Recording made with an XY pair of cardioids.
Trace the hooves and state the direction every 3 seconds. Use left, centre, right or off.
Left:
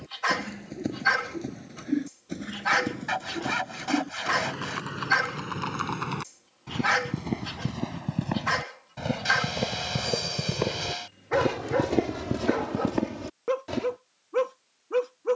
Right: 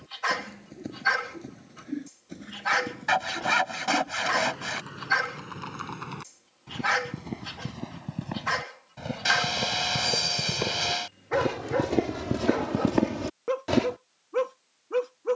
left, left, left, left, right.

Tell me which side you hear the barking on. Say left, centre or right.
centre.